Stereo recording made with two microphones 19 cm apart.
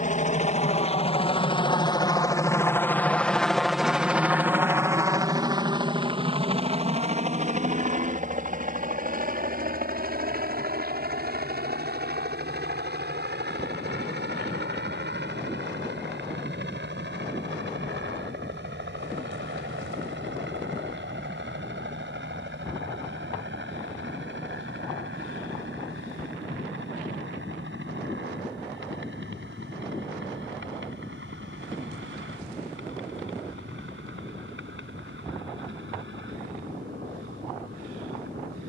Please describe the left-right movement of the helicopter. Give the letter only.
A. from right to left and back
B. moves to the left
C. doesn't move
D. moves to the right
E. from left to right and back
D.